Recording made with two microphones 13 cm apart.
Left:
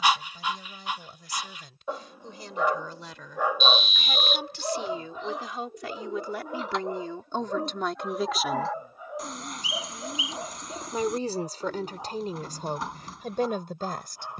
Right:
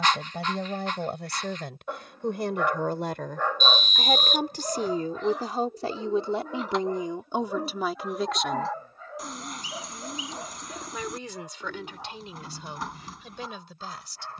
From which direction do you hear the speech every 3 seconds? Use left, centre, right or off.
right, right, centre, left, left.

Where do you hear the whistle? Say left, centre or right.
right.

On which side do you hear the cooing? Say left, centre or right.
centre.